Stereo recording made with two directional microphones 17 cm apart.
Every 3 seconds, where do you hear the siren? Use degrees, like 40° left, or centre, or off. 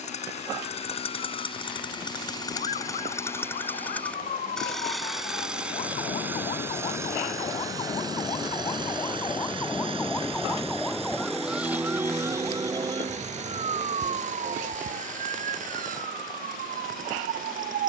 50° left, 50° left, 30° left, 10° left, 30° right, 60° right.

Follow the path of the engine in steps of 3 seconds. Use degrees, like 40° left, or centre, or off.
30° left, centre, 20° right, 30° right, 40° right, 50° right.